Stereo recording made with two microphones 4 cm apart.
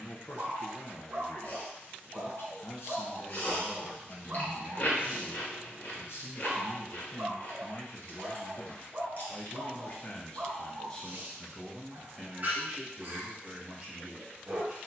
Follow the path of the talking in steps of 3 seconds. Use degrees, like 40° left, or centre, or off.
70° left, 70° left, 60° left, 20° left, 10° right.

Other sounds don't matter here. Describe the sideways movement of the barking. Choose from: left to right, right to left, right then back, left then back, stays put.
stays put.